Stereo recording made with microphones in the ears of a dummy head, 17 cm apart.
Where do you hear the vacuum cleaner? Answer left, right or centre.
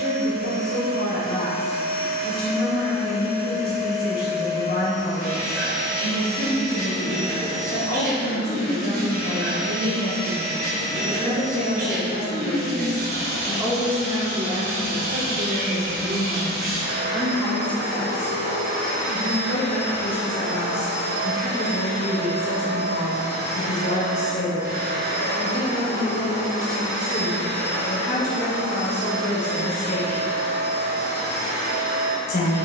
right.